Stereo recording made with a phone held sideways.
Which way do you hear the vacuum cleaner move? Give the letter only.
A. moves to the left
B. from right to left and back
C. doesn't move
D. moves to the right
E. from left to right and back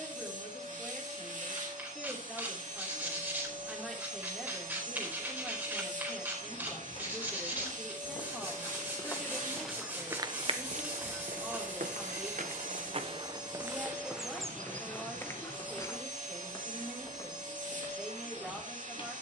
C.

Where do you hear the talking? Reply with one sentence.
In this clip you hear the talking in the centre.